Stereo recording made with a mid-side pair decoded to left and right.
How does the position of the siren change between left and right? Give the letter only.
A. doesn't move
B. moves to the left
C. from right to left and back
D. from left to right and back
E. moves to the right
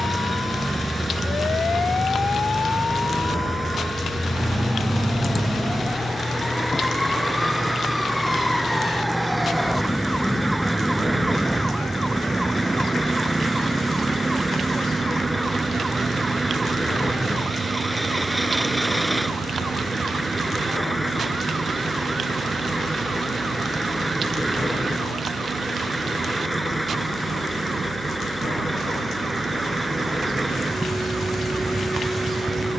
E.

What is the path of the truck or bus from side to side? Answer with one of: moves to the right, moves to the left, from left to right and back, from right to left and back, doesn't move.
doesn't move.